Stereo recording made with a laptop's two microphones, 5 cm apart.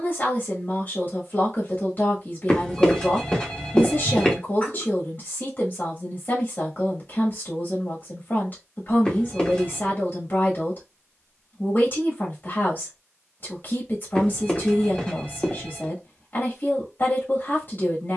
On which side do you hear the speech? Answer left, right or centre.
left.